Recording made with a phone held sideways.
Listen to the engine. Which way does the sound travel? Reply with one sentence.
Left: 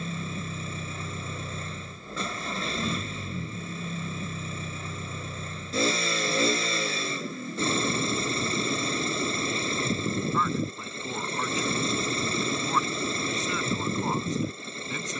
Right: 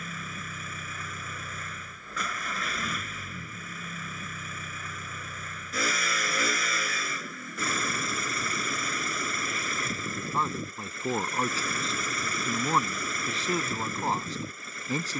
You can hear the engine stay in one place.